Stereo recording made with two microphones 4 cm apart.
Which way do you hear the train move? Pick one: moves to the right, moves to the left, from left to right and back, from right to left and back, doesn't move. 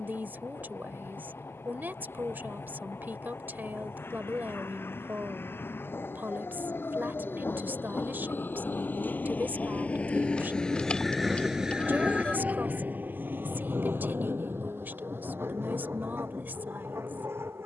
moves to the right.